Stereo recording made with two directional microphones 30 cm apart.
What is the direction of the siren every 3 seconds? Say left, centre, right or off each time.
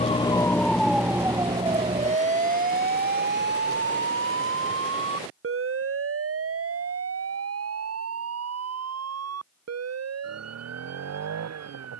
centre, right, right, right.